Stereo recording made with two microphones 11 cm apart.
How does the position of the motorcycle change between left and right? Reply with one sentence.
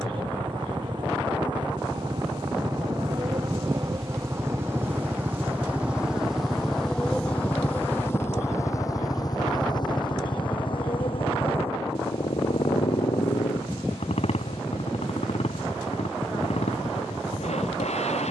In this clip you hear the motorcycle travel towards the left.